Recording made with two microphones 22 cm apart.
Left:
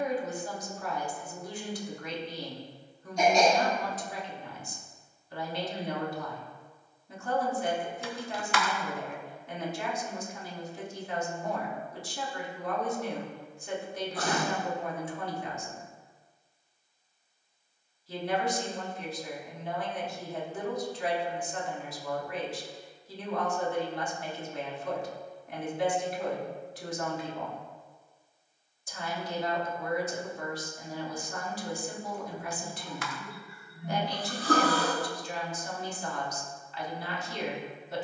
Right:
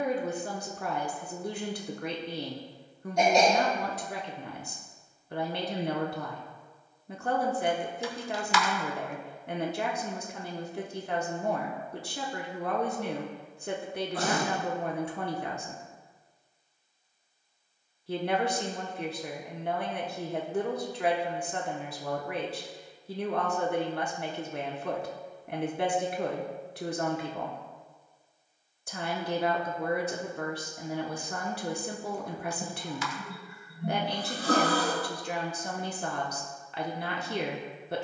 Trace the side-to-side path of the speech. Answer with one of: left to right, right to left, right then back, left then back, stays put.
stays put.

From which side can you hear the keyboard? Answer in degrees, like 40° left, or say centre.
60° left.